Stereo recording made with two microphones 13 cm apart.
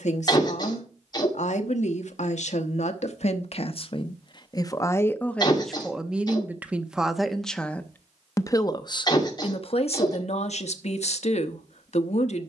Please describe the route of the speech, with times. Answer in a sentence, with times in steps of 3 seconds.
You can hear the speech on the left from 0 s, in the centre from 6 s and on the left from 9 s.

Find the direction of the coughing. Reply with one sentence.
In this clip you hear the coughing on the left.